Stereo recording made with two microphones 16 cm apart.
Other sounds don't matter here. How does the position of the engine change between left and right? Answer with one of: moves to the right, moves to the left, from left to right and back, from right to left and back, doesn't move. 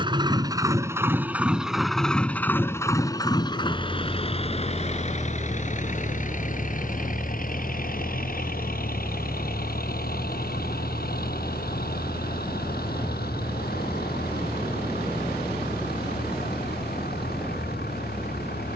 moves to the left.